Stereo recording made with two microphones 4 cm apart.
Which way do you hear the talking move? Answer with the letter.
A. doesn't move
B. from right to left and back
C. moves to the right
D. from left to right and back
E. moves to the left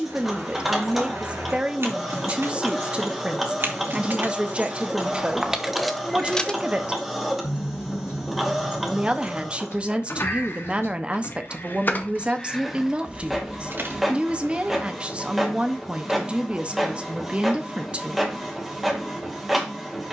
A.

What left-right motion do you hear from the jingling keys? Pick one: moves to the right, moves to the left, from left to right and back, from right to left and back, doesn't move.
from right to left and back.